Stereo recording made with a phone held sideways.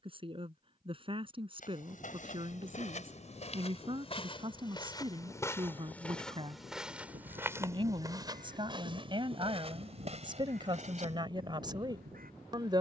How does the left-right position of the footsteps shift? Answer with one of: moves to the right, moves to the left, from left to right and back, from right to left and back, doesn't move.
moves to the right.